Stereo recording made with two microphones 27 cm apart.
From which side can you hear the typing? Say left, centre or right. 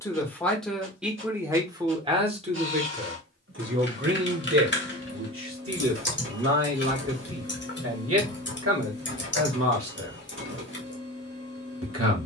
left.